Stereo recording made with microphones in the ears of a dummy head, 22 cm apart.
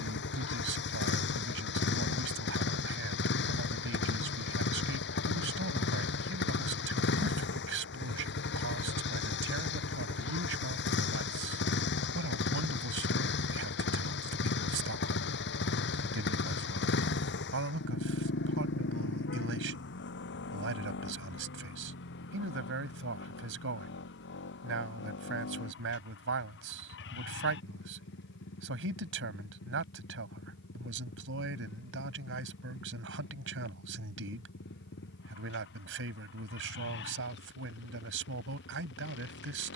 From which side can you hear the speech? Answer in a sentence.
In this clip you hear the speech on the right.